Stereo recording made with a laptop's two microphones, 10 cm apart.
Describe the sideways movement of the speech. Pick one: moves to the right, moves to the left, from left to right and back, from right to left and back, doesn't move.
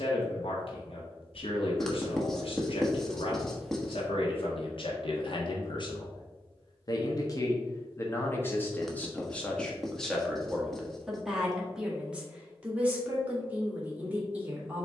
moves to the right.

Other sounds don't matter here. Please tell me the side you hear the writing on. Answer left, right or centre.
centre.